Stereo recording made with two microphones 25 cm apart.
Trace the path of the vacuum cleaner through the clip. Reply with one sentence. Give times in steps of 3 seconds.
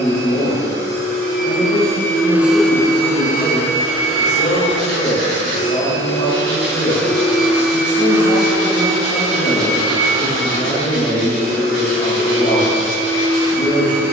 You can hear the vacuum cleaner on the right from 0 s, on the left from 3 s, in the centre from 6 s and on the right from 9 s.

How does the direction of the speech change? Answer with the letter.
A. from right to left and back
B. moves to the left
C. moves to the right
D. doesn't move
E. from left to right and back
D.